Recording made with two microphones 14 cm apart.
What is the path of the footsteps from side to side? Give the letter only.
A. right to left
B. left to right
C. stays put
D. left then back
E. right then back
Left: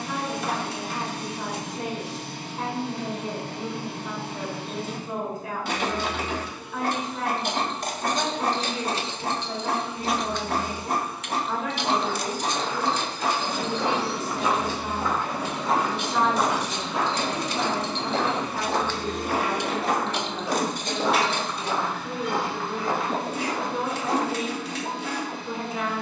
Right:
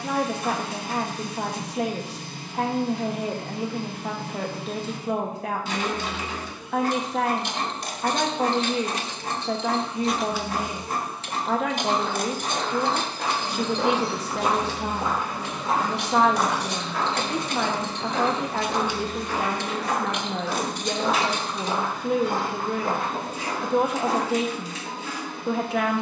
D.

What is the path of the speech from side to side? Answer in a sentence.
In this clip you hear the speech stay in one place.